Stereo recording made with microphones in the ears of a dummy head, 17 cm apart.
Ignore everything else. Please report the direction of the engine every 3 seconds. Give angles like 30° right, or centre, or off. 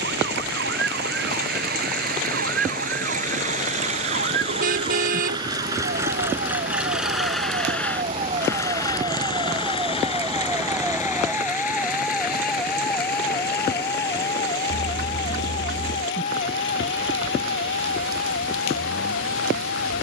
50° right, 30° right, centre, 30° left, 50° left, 60° left, 70° left.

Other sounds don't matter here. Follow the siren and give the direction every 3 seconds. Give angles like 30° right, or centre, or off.
60° right, 50° right, 40° right, 10° right, 20° left, 40° left, 50° left.